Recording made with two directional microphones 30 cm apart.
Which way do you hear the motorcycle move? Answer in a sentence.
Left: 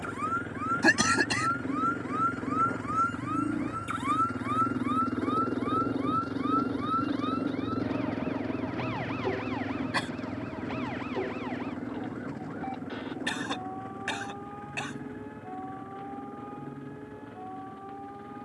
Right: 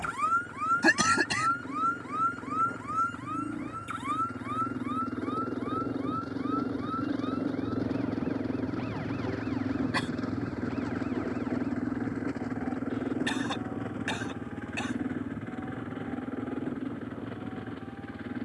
You can hear the motorcycle go from the left side to the right.